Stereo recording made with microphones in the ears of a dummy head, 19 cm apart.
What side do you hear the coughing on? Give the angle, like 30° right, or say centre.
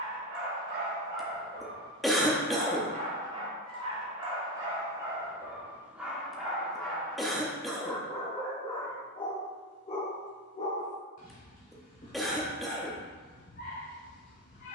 centre.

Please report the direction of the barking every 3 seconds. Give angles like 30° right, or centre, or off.
40° right, 20° right, 10° left, 40° left, 50° left.